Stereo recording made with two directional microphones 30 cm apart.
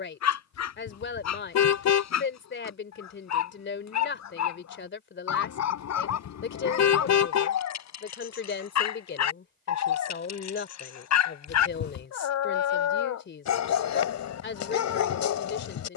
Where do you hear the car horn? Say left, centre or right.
left.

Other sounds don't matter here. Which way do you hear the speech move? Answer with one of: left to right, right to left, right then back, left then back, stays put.
stays put.